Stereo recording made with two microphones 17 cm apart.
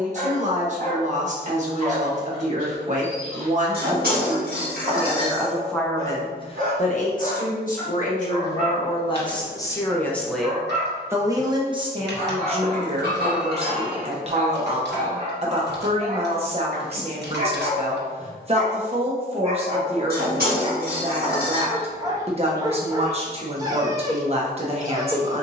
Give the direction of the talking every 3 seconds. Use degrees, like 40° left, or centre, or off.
40° right, 30° right, 40° left, centre, 40° right, 40° right, 40° right, 40° right, 40° right.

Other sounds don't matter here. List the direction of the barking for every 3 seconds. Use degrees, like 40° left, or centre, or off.
50° right, 50° right, 50° right, 50° right, 50° right, 50° right, 40° right, 20° right, 20° right.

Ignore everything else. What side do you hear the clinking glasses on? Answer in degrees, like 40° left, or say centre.
60° right.